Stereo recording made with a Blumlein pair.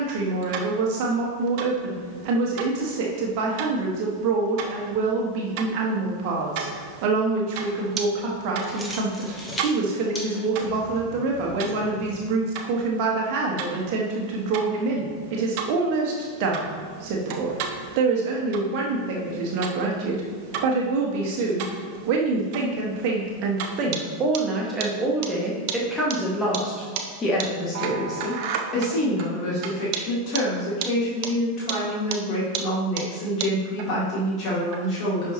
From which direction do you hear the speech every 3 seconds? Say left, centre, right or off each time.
right, right, right, right, right, right, right, right, centre, left, left, left.